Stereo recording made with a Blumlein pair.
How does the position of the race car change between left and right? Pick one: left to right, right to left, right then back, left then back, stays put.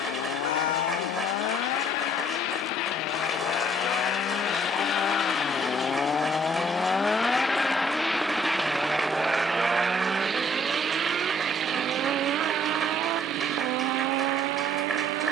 left to right.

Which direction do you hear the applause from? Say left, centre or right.
centre.